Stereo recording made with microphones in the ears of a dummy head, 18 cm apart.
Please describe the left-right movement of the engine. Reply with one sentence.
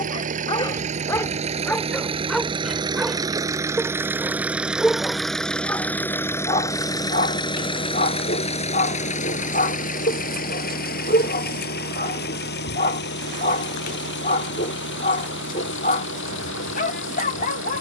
In this clip you hear the engine move from right to left.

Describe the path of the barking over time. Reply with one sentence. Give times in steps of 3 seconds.
You can hear the barking in the centre from 0 s and on the left from 6 s.